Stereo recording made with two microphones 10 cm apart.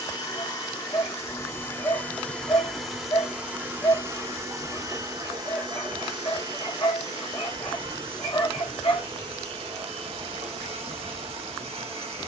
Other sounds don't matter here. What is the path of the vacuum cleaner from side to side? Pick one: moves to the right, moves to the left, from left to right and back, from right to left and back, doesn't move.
moves to the right.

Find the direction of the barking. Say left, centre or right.
left.